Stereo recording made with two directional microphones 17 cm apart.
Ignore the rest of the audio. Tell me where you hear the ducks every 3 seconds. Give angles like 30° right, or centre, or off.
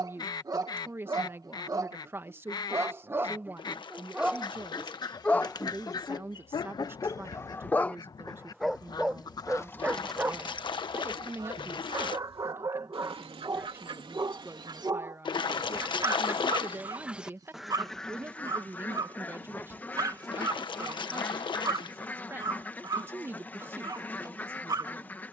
20° left, 20° left, 20° left, 10° right, 30° right, 10° right, 10° left, 10° left, 10° left.